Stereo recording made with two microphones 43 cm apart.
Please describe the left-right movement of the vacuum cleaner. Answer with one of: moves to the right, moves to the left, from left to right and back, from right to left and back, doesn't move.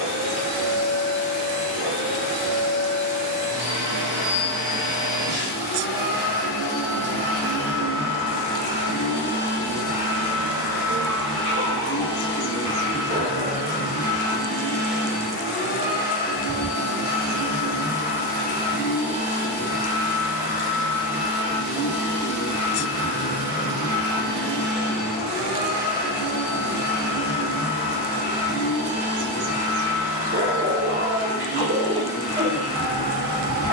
moves to the left.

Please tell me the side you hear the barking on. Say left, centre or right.
right.